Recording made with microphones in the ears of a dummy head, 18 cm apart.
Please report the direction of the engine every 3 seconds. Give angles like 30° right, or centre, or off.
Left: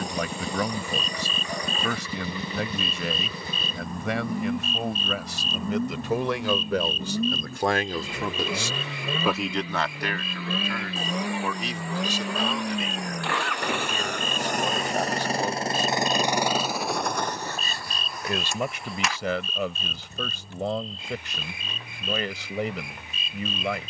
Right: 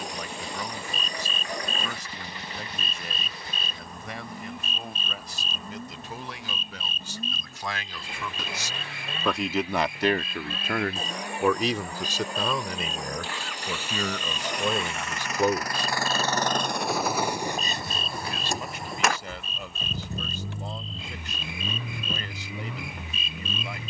80° left, 70° left, 70° left, 60° left, 50° left, 10° left, 40° right, 70° right.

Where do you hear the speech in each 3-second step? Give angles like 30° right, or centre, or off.
60° left, 60° left, 40° left, 30° right, 80° right, 60° right, 60° left, 60° left.